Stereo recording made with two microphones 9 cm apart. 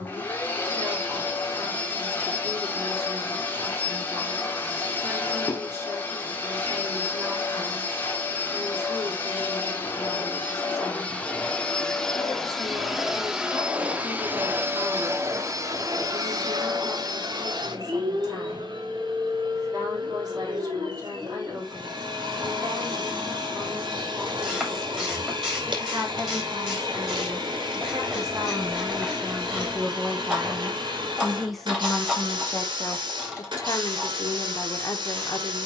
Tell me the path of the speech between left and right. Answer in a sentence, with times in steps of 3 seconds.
You can hear the speech on the right from 0 s, in the centre from 30 s and on the left from 33 s.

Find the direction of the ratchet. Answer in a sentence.
In this clip you hear the ratchet in the centre.